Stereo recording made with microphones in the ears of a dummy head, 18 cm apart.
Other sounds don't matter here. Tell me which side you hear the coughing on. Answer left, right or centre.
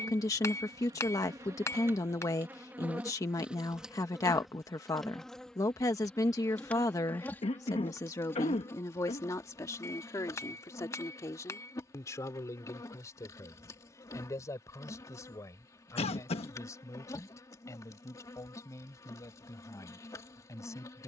left.